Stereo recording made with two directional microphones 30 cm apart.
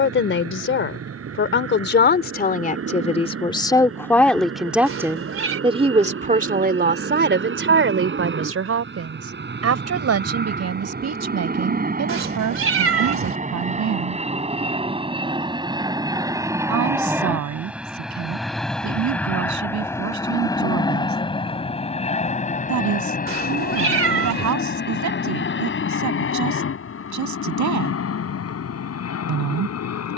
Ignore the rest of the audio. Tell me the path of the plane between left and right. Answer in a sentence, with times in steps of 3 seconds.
In this clip you hear the plane on the right from 0 s, in the centre from 15 s and on the left from 21 s.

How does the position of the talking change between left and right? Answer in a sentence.
You can hear the talking move from left to right.